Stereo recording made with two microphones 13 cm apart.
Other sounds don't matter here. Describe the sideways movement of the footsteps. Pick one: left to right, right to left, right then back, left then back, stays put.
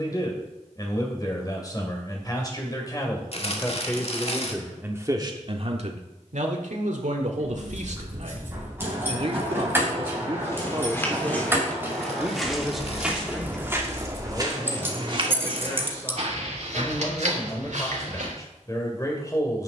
left to right.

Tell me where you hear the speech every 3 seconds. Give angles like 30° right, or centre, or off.
30° left, 10° right, 70° right, 30° right, centre, 20° left, 30° left.